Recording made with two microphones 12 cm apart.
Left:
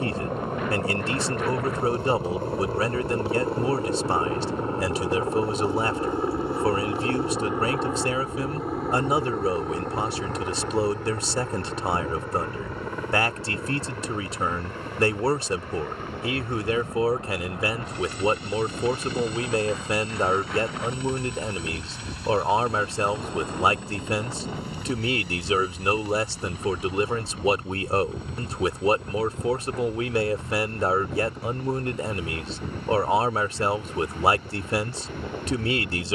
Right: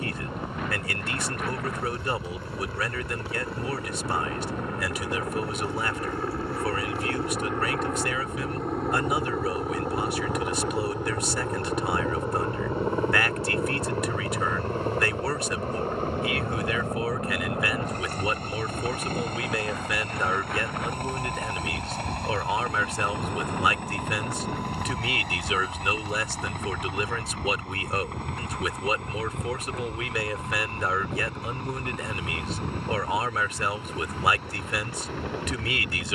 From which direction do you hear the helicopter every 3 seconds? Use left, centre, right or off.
left, left, centre, centre, right, right, right, right, right, right, right, right.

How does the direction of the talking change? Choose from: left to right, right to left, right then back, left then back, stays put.
stays put.